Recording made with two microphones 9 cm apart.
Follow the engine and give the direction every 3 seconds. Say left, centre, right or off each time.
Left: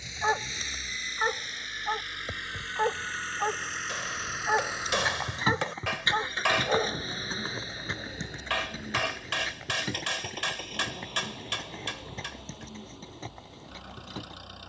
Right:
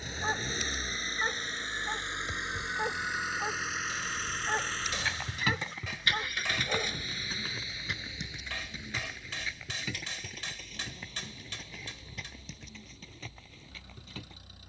right, centre, left, left, left.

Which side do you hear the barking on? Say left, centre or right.
left.